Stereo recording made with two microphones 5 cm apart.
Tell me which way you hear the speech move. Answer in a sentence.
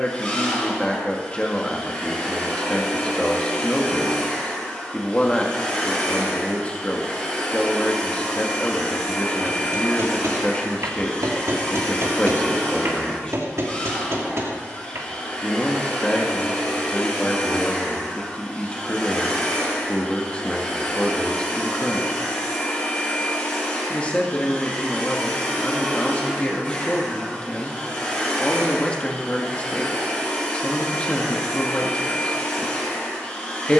You can hear the speech stay put.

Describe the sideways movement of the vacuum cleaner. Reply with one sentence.
You can hear the vacuum cleaner stay in one place.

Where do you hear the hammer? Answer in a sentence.
You can hear the hammer on the right.